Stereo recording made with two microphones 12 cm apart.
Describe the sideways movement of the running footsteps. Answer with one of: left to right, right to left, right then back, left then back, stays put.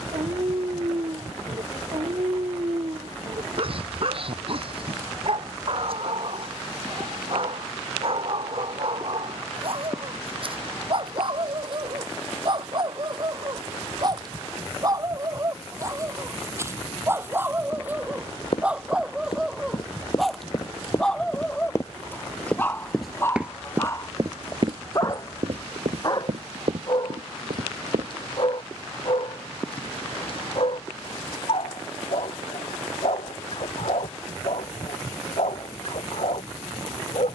left to right.